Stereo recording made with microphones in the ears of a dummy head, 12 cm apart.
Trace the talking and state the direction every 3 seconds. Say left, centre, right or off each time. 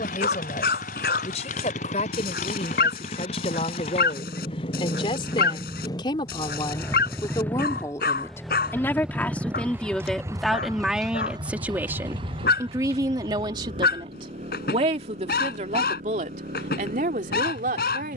left, left, left, centre, right, right.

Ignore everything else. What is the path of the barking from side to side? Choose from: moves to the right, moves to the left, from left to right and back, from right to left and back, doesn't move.
doesn't move.